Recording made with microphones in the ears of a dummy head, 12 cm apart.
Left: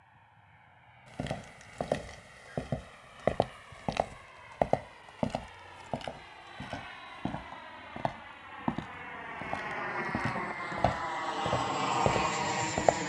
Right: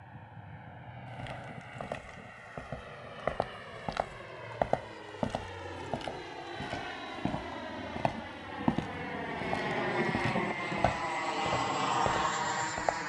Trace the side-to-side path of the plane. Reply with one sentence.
You can hear the plane move to the left.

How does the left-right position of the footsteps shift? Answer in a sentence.
You can hear the footsteps go right and come back.